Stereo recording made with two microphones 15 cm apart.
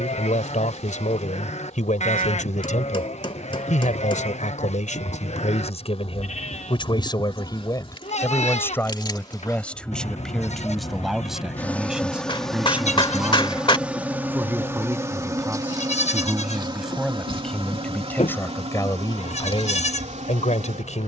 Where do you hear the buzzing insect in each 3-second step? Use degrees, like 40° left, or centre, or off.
50° left, 50° left, 40° left, 20° left, 10° right, 30° right, 50° right.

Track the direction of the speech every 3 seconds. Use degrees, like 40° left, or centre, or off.
50° left, 50° left, 20° left, centre, 10° right, centre, 30° left.